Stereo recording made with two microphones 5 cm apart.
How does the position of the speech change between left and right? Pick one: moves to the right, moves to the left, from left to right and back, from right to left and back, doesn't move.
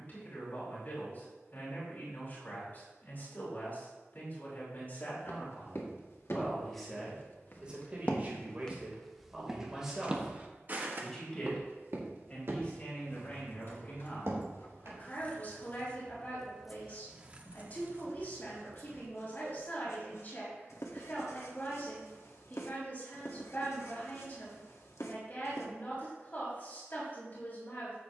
from left to right and back.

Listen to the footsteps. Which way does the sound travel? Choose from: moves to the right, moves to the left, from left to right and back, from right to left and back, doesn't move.
moves to the right.